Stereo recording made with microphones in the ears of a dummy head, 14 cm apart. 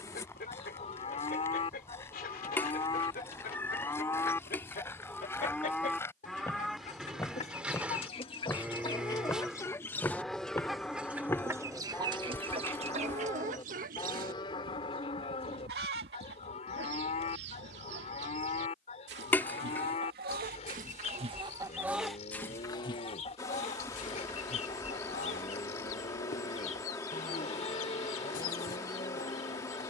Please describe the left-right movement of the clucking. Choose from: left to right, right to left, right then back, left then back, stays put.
right then back.